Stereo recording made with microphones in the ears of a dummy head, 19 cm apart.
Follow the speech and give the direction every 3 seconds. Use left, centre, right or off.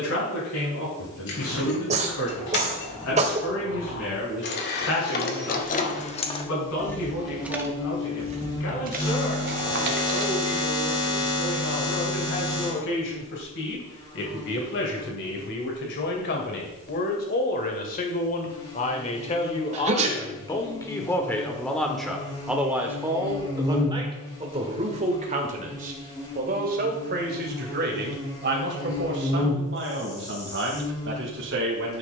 left, left, left, left, left, left, left, centre, right, right, right.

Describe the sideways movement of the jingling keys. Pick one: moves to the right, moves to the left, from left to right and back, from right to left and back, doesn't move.
moves to the right.